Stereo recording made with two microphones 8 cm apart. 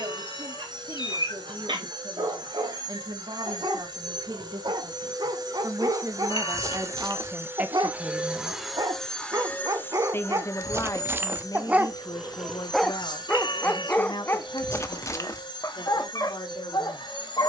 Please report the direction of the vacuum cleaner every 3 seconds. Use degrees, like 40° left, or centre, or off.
70° right, 60° right, 30° right, 30° left, 60° left, 70° left.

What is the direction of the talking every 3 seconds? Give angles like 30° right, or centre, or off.
70° right, 50° right, 30° right, 40° left, 60° left, 70° left.